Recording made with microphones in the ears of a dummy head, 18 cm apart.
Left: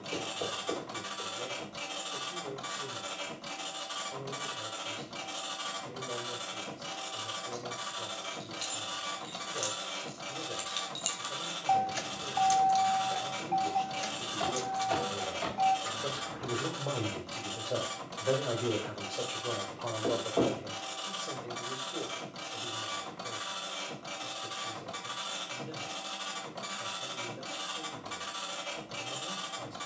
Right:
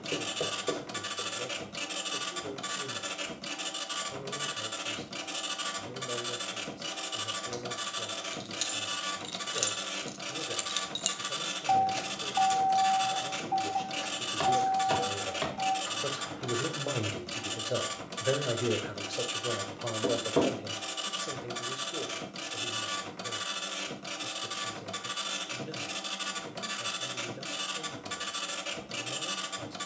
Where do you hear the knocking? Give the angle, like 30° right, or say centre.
80° right.